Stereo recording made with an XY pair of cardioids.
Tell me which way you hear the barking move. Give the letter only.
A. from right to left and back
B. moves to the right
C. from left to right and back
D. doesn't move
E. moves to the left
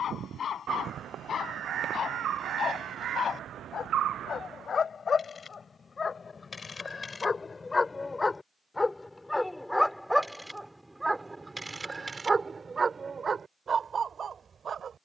B.